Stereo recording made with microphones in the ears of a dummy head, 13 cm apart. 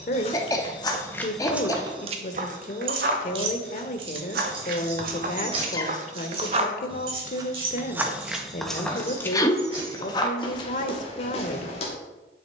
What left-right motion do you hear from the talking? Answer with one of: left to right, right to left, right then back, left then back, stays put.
stays put.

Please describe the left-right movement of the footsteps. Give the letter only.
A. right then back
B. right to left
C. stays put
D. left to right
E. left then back
A.